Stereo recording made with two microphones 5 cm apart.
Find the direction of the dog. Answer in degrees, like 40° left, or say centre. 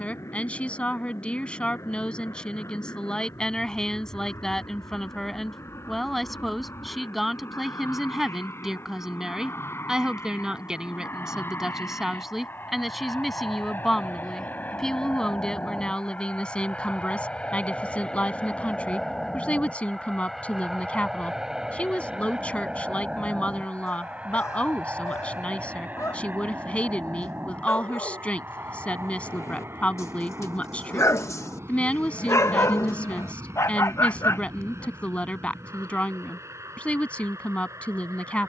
70° left.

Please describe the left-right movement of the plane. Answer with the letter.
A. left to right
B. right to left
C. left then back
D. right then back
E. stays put
A.